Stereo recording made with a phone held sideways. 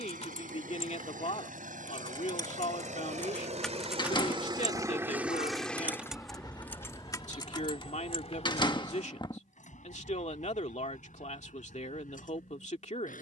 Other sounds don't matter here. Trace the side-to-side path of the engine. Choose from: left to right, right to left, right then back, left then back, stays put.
right to left.